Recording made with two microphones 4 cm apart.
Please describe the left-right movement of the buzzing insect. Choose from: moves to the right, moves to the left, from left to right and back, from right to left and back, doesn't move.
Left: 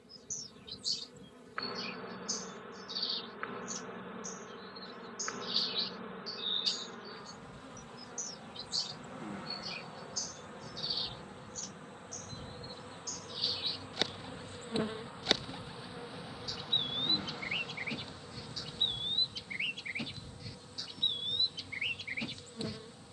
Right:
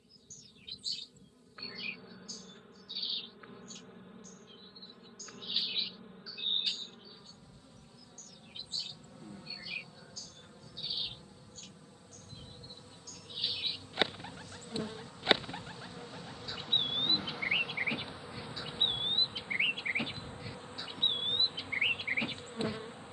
moves to the right.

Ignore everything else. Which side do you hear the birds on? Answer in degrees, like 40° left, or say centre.
20° right.